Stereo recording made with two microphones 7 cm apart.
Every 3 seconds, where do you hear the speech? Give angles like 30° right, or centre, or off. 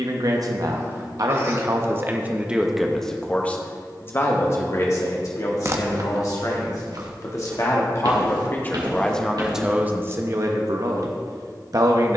40° right, 40° left, 40° left, 30° right.